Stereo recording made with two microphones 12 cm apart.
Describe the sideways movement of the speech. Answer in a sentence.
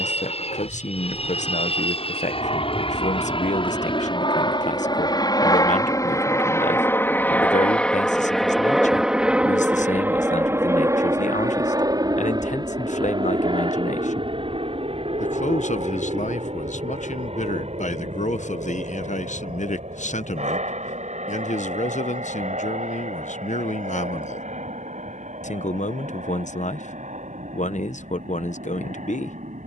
In this clip you hear the speech stay put.